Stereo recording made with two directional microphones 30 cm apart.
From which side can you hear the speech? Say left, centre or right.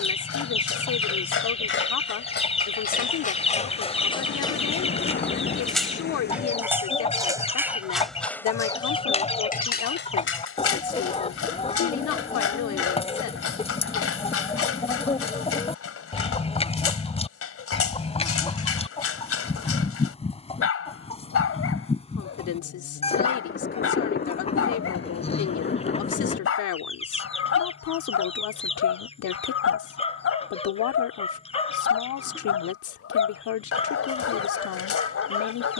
left.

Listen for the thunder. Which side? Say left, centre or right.
left.